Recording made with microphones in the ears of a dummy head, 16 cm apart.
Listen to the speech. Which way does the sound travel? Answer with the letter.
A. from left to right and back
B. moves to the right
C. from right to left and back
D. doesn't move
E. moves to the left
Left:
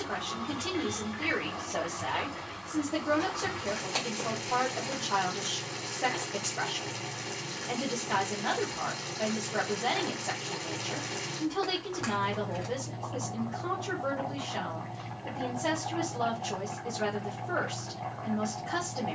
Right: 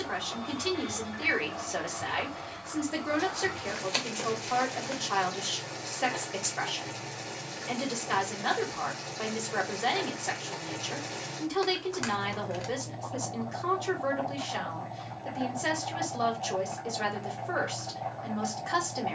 D.